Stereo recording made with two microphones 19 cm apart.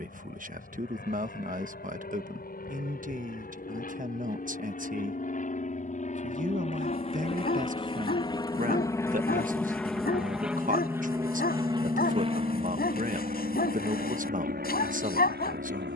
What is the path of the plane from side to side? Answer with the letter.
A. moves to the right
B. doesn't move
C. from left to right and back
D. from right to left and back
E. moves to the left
A.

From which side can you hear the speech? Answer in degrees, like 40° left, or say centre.
50° right.